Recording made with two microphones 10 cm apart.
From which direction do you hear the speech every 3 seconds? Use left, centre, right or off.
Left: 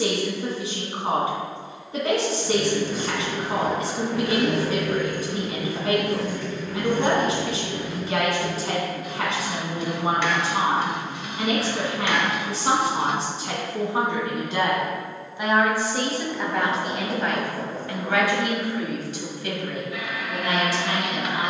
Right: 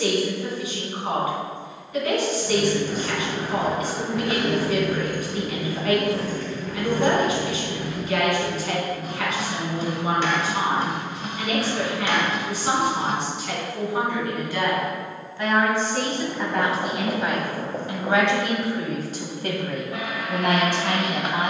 left, left, left, left, left, centre, right.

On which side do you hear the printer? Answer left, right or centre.
right.